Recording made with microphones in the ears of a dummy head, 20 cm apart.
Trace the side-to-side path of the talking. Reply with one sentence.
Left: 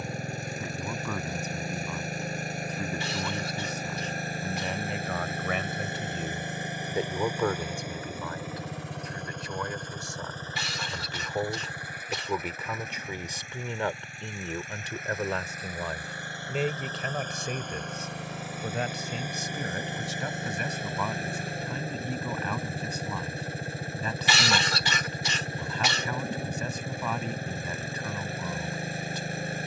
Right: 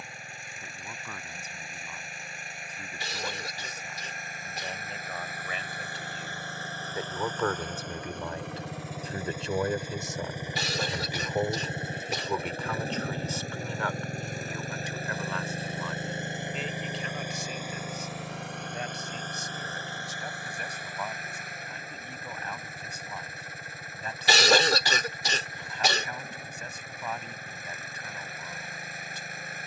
You can hear the talking move from left to right and back again.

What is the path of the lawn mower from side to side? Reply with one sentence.
You can hear the lawn mower go right and come back.